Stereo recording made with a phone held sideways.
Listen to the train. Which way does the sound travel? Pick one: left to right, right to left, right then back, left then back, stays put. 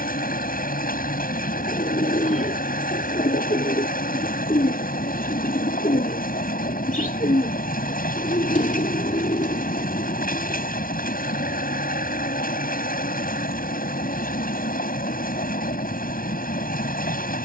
stays put.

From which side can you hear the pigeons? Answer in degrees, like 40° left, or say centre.
60° left.